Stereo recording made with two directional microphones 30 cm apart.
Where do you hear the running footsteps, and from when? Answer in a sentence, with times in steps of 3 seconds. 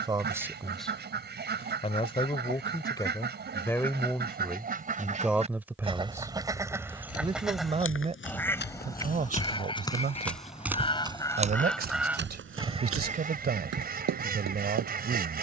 You can hear the running footsteps not at all from 0 s, on the left from 6 s, in the centre from 9 s and on the right from 12 s.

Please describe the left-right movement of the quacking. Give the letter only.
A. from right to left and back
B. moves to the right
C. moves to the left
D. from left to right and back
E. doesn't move
A.